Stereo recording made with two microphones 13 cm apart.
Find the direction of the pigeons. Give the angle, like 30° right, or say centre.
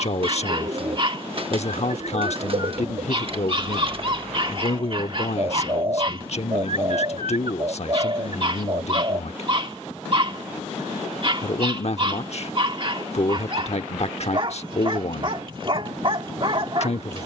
40° right.